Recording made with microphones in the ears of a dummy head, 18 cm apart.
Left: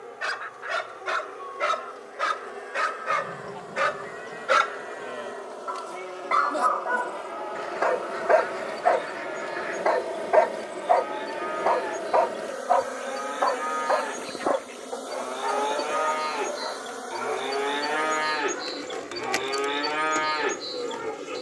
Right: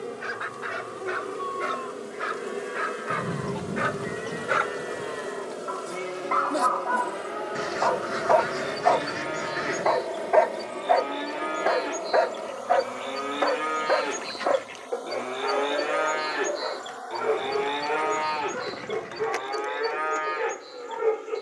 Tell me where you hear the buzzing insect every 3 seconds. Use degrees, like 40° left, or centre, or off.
50° right, 30° right, 20° right, centre, 20° left, 40° left, 50° left.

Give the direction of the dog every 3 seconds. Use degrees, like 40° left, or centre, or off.
70° left, 50° left, 30° left, centre, 30° right, 40° right, 60° right.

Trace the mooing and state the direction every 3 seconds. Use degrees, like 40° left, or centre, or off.
60° right, 60° right, 60° right, 50° right, 40° right, 10° right, 40° left.